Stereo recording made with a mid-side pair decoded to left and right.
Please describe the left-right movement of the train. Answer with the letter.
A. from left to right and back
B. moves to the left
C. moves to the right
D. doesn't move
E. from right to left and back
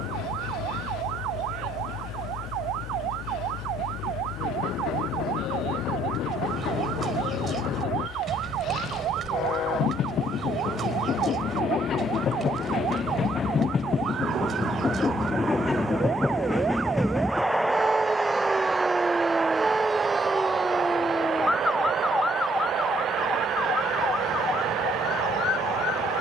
C.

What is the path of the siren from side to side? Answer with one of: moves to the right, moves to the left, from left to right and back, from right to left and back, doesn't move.
moves to the left.